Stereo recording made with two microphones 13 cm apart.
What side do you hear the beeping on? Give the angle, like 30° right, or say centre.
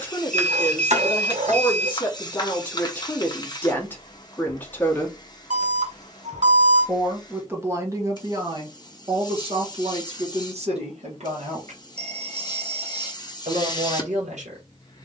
60° right.